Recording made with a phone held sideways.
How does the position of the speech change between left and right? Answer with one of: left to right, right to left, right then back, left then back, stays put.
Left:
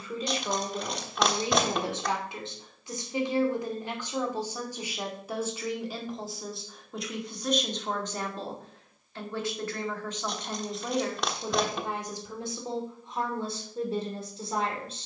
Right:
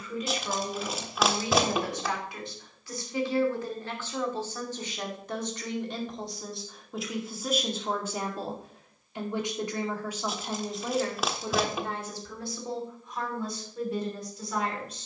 right then back.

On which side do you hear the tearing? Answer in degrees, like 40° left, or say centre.
centre.